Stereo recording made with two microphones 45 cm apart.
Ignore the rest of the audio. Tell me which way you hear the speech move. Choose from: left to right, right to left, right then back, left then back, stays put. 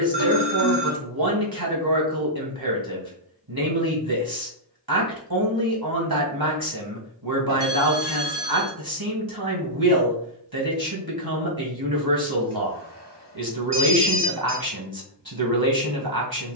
stays put.